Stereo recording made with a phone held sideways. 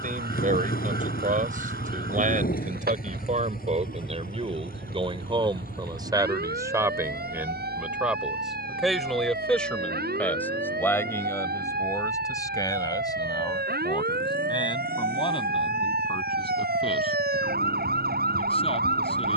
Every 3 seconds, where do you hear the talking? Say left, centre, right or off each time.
right, right, centre, centre, left, left, left.